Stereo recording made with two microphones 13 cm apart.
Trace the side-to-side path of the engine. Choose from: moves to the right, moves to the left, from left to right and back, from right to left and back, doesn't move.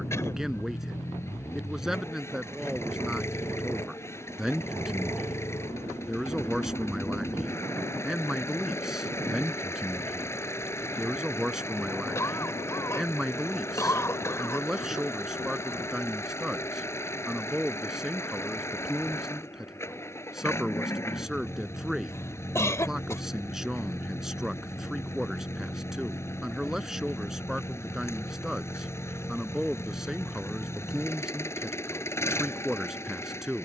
doesn't move.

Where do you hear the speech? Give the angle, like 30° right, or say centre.
centre.